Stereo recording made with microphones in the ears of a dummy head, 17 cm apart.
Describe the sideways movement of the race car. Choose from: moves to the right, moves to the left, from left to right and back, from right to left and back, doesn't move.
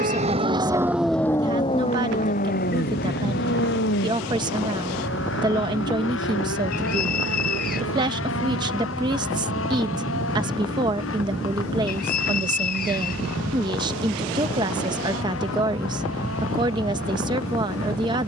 moves to the left.